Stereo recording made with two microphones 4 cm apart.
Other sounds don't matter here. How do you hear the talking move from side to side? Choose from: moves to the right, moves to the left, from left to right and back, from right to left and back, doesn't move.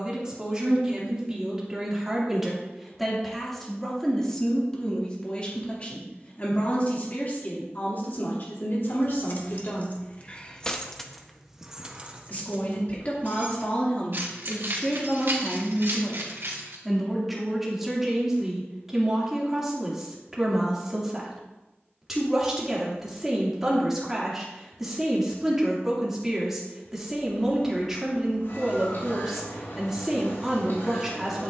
from right to left and back.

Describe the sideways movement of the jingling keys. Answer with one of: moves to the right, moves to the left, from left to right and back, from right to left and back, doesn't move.
moves to the right.